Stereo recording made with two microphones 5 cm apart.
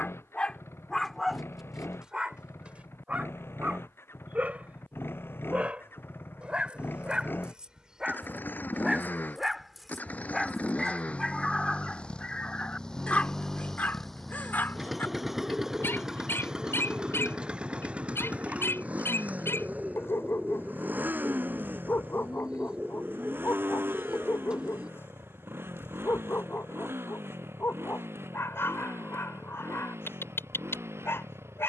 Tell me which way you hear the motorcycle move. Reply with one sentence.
You can hear the motorcycle move to the right.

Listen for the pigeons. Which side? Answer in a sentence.
You can hear the pigeons on the right.